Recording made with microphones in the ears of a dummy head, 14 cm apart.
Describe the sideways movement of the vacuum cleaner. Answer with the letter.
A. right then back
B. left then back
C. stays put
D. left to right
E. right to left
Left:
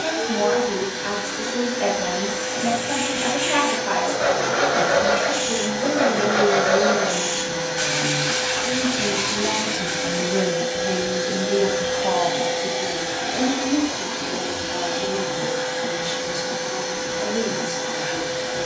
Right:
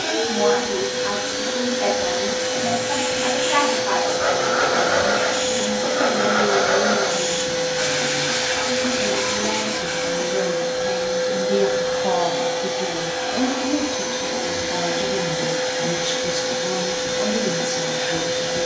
B.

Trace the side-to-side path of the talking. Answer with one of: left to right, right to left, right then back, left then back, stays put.
left to right.